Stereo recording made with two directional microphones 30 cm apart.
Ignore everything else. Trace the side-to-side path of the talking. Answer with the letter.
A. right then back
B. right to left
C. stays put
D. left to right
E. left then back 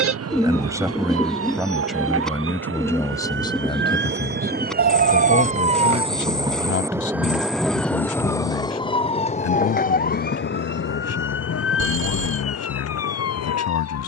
B.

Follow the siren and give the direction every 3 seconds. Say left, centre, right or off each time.
right, right, centre, left, left.